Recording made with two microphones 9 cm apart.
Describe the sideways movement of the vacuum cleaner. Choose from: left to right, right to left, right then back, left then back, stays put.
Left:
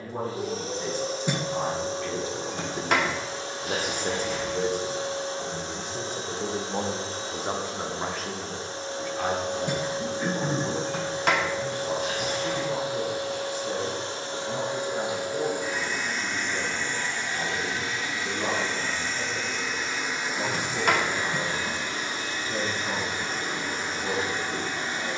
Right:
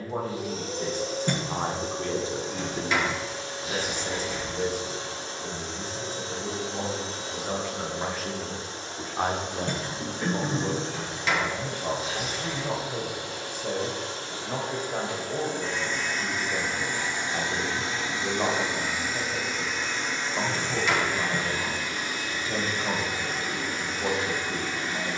right then back.